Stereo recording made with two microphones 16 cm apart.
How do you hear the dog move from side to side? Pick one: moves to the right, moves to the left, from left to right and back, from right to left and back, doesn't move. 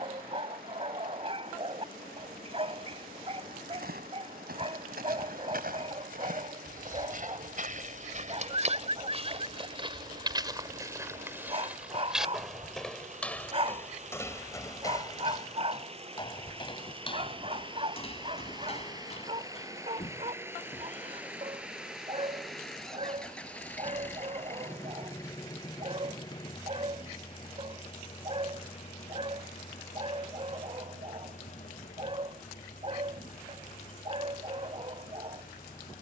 doesn't move.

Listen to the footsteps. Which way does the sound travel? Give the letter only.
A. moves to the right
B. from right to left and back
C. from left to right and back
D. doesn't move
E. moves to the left
E.